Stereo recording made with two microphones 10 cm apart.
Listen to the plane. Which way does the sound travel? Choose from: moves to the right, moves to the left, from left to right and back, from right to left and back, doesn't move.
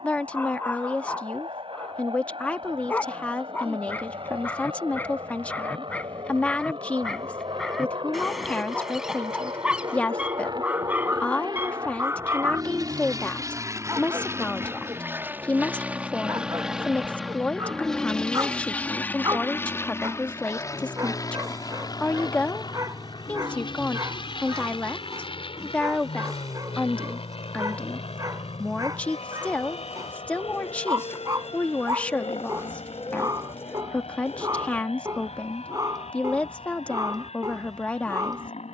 moves to the left.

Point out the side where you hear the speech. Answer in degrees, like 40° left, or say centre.
10° left.